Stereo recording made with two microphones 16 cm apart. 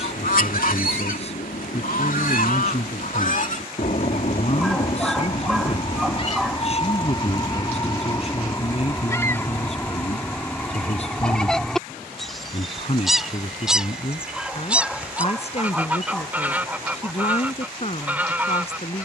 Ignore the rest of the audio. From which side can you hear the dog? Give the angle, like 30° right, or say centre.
centre.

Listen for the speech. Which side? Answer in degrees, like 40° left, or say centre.
40° left.